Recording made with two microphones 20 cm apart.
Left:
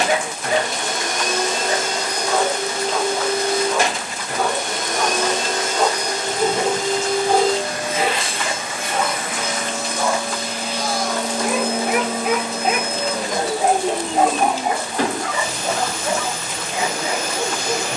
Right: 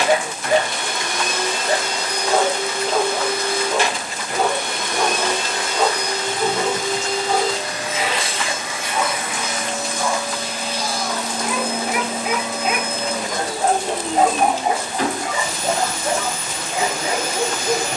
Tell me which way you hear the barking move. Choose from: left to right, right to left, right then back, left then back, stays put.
left then back.